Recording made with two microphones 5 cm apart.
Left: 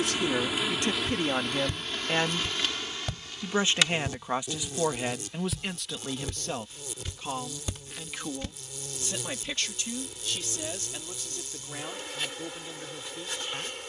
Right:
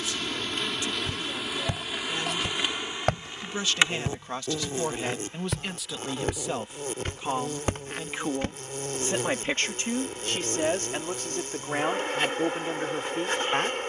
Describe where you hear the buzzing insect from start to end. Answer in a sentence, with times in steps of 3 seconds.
In this clip you hear the buzzing insect in the centre from 0 s and on the right from 3 s.